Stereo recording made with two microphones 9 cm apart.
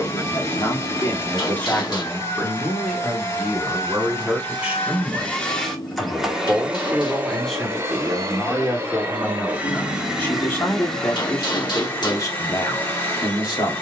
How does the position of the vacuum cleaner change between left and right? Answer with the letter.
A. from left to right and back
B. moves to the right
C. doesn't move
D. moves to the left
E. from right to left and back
A.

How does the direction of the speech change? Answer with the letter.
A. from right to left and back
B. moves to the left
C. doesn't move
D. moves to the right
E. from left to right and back
E.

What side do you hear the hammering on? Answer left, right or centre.
left.